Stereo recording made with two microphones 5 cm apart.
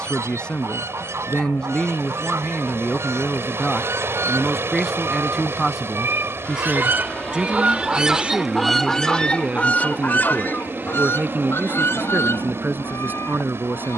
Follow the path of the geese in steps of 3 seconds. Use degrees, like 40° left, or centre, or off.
70° right, 70° right, 30° right, 40° left, 70° left.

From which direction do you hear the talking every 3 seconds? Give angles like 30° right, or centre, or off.
20° left, centre, 20° right, 30° right, 40° right.